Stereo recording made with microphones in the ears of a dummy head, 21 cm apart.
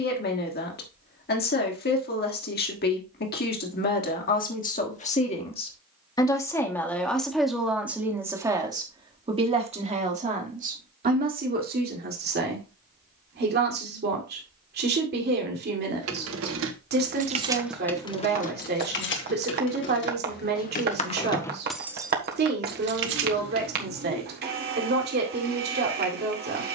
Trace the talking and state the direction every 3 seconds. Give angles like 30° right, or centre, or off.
40° left, 40° left, centre, 30° right, 40° right, 40° right, 40° right, 40° right, 40° right.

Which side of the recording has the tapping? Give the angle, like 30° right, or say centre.
40° right.